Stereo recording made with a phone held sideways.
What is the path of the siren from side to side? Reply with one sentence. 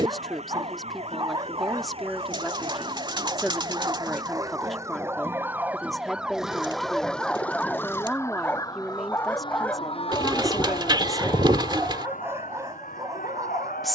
You can hear the siren travel towards the left.